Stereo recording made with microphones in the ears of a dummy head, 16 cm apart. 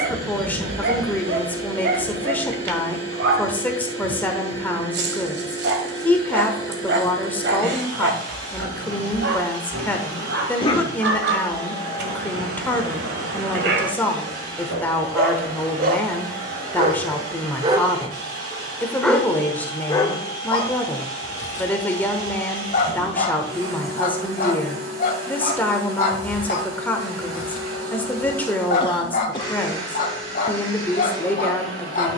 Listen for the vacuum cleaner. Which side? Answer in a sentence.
In this clip you hear the vacuum cleaner on the right.